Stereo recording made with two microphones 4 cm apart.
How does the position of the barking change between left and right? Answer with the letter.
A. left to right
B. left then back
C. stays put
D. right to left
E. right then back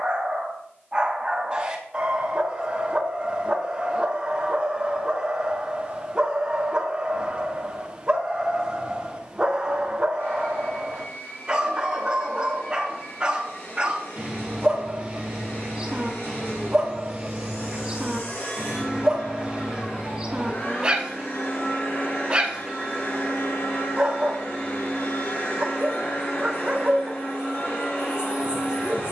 C.